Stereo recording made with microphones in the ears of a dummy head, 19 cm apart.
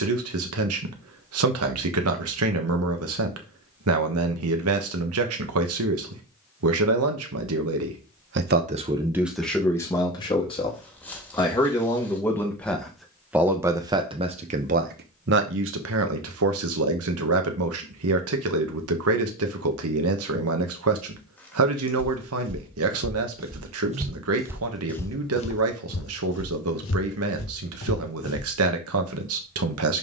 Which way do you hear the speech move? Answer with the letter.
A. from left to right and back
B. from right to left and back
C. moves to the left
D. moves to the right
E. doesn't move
B.